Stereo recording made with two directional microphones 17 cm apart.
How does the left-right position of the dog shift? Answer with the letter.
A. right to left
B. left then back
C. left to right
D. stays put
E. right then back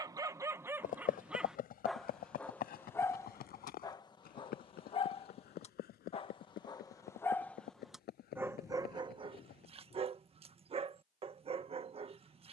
B.